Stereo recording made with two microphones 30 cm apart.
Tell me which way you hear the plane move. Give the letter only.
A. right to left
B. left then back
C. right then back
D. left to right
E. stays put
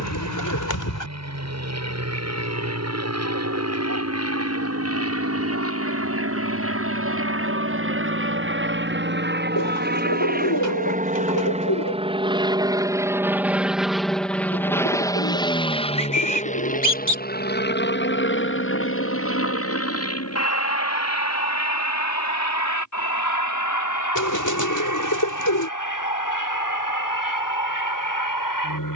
A.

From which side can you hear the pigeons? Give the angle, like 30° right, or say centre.
70° left.